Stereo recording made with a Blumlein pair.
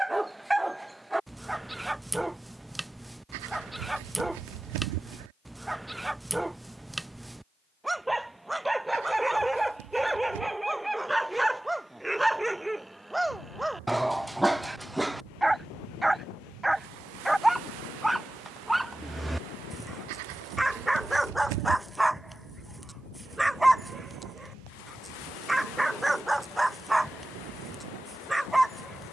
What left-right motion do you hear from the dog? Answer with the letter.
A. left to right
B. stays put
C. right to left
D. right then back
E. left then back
B.